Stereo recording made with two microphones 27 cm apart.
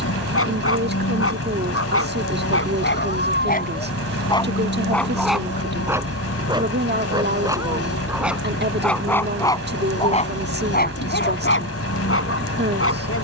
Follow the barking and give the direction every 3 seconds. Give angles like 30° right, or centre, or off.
60° left, 20° left, 10° right, 30° left, 60° left.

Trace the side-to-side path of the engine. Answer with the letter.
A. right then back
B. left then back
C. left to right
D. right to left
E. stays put
E.